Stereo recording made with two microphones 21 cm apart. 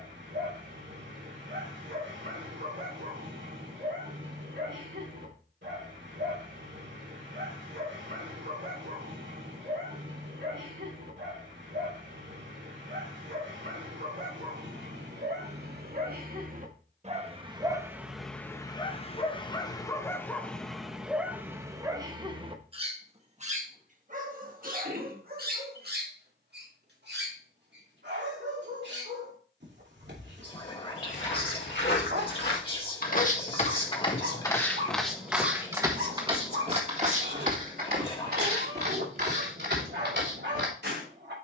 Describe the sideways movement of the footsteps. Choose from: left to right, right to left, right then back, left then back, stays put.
left to right.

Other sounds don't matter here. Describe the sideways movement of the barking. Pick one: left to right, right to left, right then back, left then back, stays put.
left then back.